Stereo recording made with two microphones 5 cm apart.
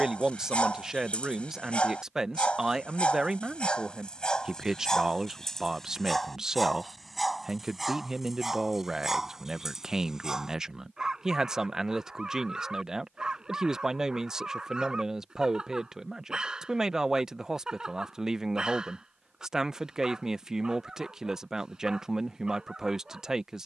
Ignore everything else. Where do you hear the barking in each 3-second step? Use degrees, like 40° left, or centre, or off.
20° left, 20° left, centre, 10° right, 10° right, 10° right, 10° right, 10° right.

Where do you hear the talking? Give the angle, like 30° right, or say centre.
10° right.